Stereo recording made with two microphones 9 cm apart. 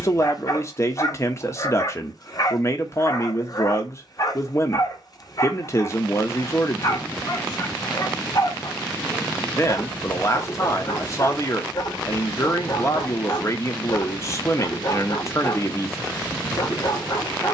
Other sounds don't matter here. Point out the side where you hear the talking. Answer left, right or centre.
left.